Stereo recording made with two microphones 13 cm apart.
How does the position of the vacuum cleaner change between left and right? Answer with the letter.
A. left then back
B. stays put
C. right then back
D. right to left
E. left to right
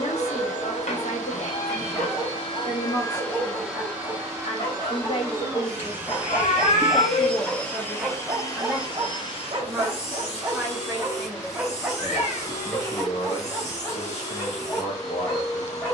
C.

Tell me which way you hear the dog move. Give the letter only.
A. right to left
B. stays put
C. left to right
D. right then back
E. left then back
D.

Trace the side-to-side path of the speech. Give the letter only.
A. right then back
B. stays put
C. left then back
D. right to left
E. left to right
A.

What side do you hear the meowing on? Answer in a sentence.
You can hear the meowing on the left.